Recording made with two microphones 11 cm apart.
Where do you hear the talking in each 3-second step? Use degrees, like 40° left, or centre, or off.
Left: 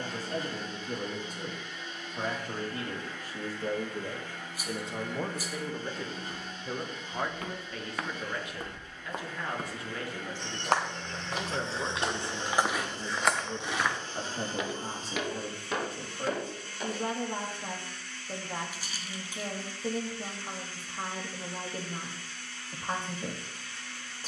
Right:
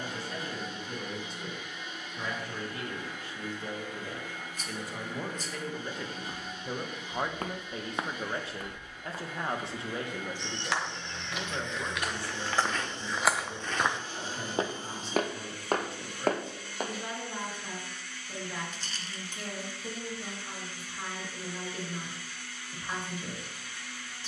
40° left, 30° left, 20° right, 10° right, 30° left, 40° left, 40° left, 40° left.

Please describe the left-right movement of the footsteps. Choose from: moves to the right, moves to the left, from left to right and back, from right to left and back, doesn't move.
from right to left and back.